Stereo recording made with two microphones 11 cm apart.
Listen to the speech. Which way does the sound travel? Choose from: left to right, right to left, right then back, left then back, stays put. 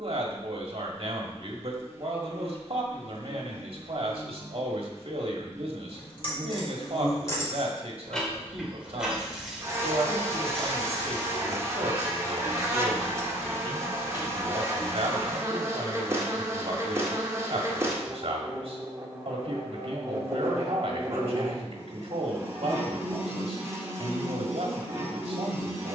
stays put.